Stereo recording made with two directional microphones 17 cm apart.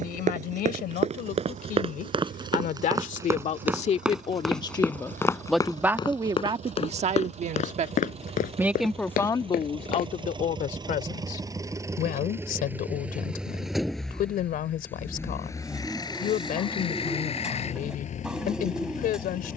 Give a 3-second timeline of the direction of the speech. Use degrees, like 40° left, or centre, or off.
60° left, 30° left, 30° right, 40° left, 60° left, 60° left, 60° left.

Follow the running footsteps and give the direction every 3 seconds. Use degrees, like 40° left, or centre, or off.
40° right, centre, 40° left, 60° left, off, off, off.